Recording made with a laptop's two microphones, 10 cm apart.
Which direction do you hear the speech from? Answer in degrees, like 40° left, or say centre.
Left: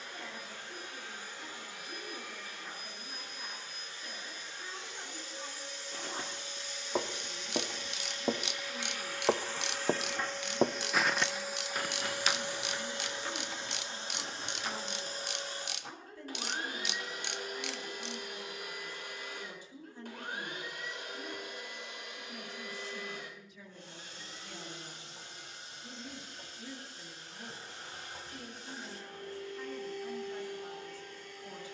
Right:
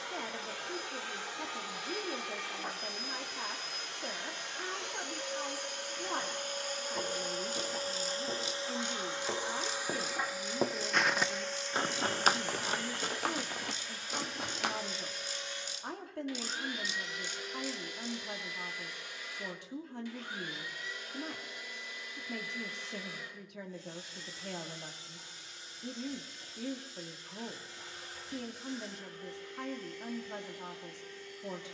60° right.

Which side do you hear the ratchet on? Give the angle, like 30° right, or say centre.
70° left.